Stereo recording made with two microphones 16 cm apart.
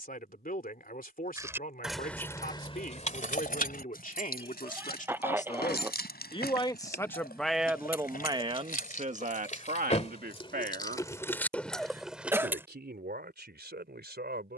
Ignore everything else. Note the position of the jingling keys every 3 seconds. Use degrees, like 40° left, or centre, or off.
10° left, 70° left, 70° left, 30° left, 10° right.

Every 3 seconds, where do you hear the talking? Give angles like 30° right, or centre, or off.
60° left, 50° left, centre, 60° right, 80° right.